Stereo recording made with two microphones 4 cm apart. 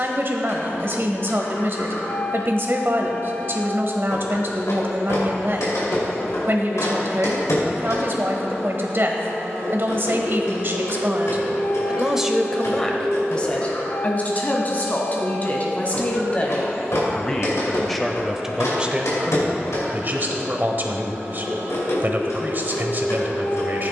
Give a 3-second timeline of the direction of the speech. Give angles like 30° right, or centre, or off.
50° right, 50° right, 50° right, 50° right, 20° left, 20° left, 30° right, 40° right.